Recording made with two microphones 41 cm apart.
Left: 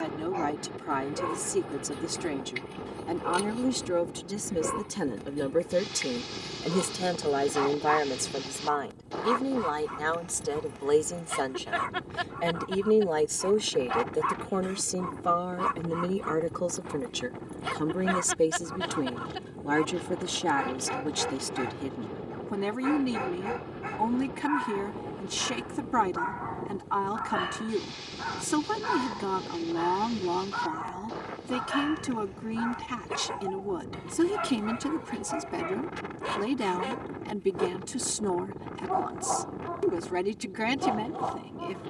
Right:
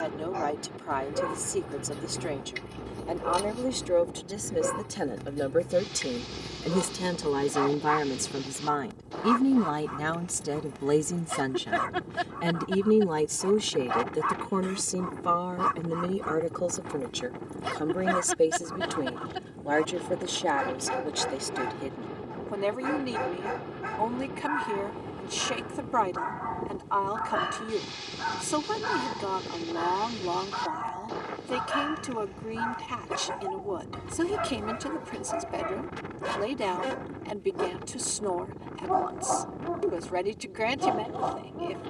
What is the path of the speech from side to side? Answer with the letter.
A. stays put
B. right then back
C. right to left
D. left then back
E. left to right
B.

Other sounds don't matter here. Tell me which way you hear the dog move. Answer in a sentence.
You can hear the dog stay in one place.